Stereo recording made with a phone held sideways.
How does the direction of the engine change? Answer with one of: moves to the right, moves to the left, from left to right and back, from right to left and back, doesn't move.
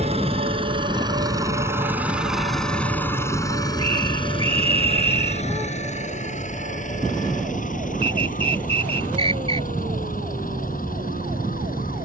moves to the left.